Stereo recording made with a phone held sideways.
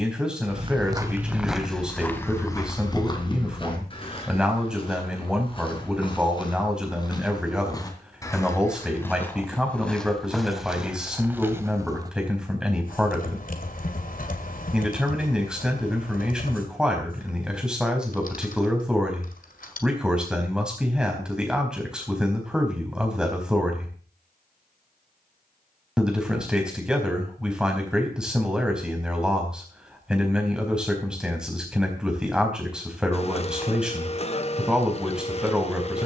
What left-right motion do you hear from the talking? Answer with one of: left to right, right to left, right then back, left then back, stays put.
stays put.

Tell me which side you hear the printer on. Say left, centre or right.
left.